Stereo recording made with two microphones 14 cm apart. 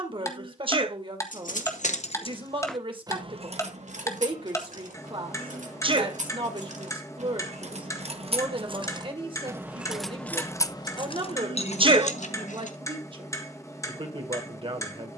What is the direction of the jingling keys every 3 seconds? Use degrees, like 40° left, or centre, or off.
50° left, 60° right, 50° right, 20° left, 60° left.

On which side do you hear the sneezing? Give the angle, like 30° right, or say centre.
40° right.